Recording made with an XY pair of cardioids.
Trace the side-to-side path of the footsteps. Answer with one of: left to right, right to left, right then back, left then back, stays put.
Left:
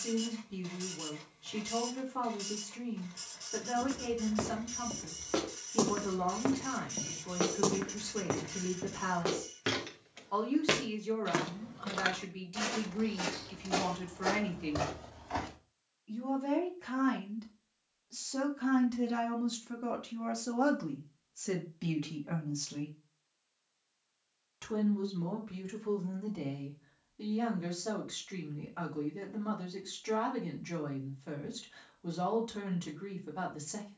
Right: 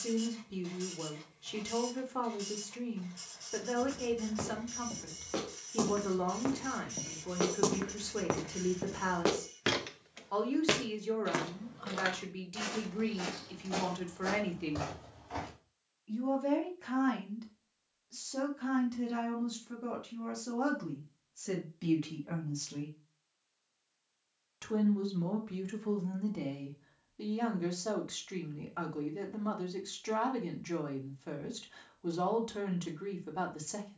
right then back.